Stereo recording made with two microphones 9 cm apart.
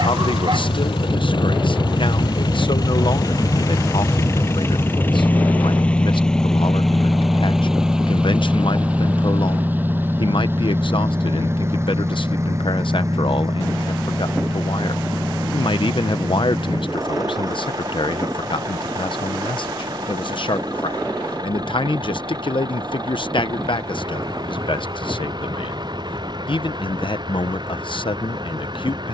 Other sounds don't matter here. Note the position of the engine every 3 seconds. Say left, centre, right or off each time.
left, left, centre, right, right, right, right, right, right, right.